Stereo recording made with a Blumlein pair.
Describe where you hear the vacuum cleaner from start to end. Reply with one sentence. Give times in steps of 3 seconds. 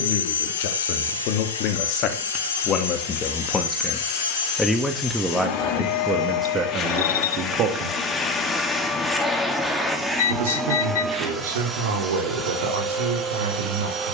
In this clip you hear the vacuum cleaner on the left from 0 s, in the centre from 9 s and on the right from 12 s.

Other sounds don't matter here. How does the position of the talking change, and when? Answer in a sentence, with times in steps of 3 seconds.
You can hear the talking on the left from 0 s, in the centre from 3 s and on the right from 6 s.